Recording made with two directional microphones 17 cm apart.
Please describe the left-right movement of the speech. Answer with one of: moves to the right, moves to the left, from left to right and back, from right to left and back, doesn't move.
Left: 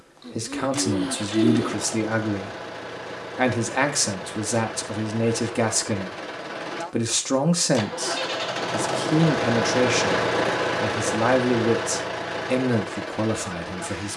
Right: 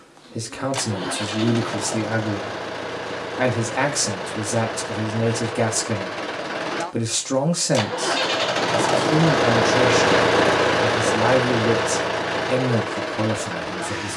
doesn't move.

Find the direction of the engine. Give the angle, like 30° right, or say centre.
30° right.